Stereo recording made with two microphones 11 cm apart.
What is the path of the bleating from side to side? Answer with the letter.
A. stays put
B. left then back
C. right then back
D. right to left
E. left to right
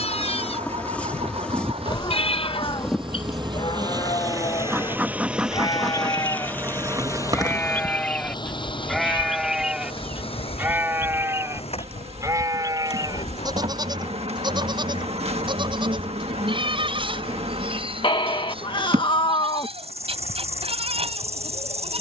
E.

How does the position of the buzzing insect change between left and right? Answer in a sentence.
You can hear the buzzing insect go from the left side to the right.